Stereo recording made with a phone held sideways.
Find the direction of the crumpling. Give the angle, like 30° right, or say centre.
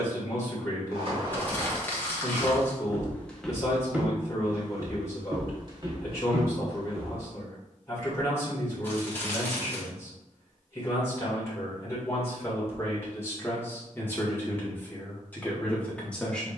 10° left.